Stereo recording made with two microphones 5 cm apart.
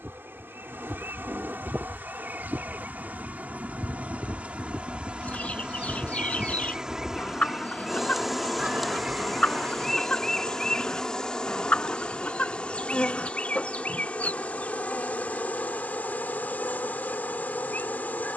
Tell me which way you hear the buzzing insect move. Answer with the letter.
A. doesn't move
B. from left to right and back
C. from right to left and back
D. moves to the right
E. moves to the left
E.